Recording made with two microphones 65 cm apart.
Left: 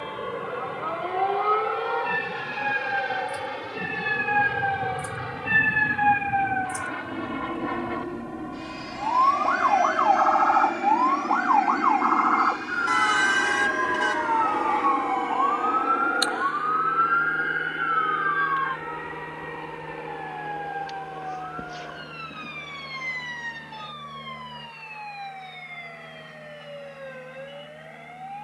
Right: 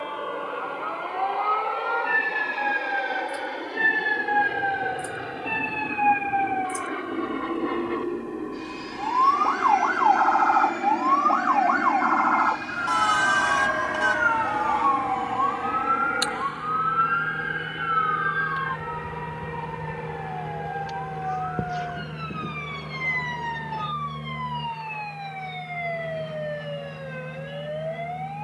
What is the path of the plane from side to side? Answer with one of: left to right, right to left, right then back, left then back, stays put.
left to right.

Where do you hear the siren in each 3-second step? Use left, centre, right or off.
left, left, left, centre, right, right, right, right, right, right.